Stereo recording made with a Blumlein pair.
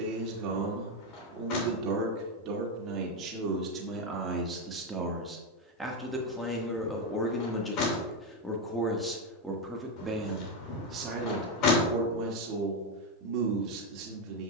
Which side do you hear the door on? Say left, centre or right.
left.